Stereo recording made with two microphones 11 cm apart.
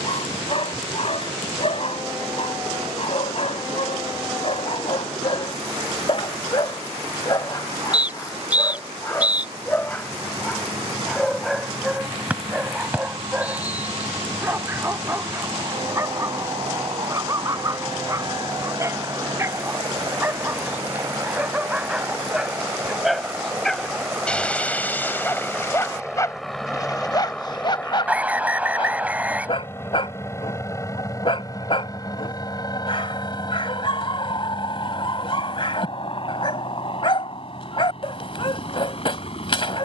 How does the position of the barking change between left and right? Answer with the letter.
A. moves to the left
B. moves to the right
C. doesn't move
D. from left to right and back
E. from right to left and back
D.